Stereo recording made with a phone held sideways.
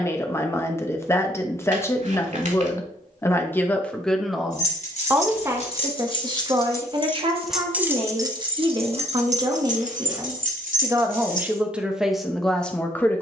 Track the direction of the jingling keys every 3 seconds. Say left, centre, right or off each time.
off, left, centre, right, off.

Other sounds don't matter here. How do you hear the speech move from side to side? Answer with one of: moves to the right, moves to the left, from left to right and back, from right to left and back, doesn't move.
from left to right and back.